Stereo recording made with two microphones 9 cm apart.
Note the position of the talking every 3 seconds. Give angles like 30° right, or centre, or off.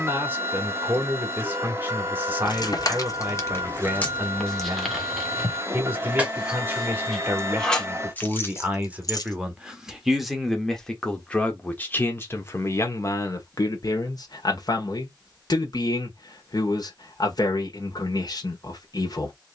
30° right, 30° right, 20° right, centre, 40° left, 50° left, 50° left.